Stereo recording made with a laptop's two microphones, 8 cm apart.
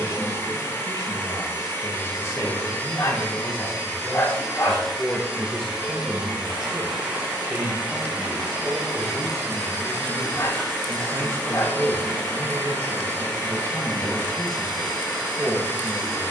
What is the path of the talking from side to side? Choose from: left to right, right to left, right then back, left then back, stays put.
left to right.